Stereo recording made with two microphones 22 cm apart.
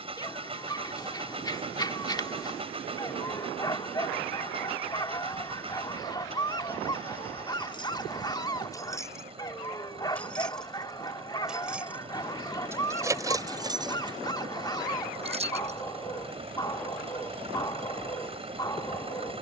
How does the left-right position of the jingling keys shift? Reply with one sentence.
In this clip you hear the jingling keys move to the right.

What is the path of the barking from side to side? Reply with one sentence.
In this clip you hear the barking stay put.